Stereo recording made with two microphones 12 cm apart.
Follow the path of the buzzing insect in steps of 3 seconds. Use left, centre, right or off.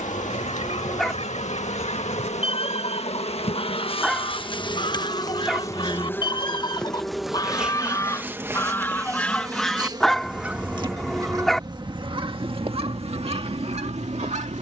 left, left, centre, right, right.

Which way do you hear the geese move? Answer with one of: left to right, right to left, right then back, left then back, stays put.
left to right.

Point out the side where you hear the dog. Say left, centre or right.
centre.